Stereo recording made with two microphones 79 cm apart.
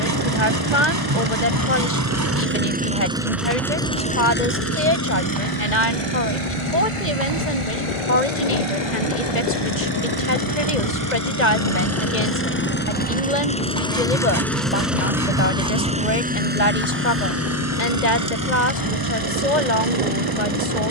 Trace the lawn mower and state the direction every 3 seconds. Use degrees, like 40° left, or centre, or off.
20° right, 10° left, 40° left, 30° left, 10° left, 10° right, 30° right.